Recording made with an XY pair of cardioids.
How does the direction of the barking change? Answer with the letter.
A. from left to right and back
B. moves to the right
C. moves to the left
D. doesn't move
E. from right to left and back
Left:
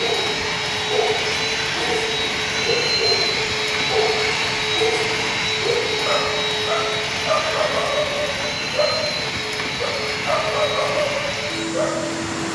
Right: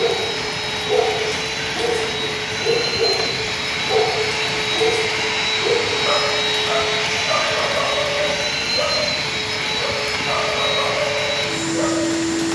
C.